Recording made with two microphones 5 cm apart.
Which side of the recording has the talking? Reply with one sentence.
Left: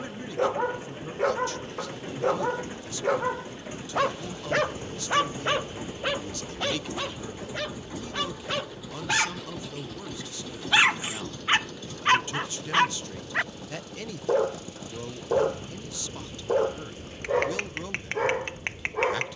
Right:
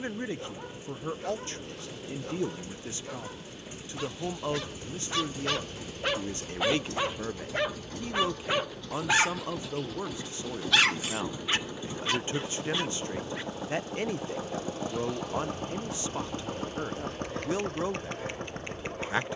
In this clip you hear the talking on the right.